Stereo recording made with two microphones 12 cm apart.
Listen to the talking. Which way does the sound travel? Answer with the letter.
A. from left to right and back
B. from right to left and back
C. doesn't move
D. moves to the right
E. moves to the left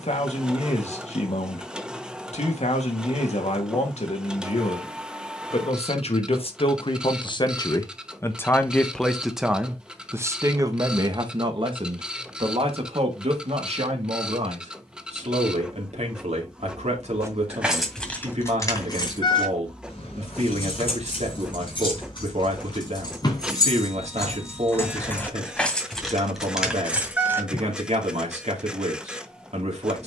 D.